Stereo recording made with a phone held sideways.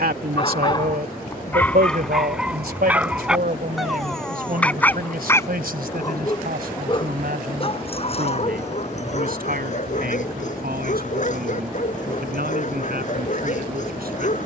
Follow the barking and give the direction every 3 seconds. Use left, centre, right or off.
centre, centre, left, left, left.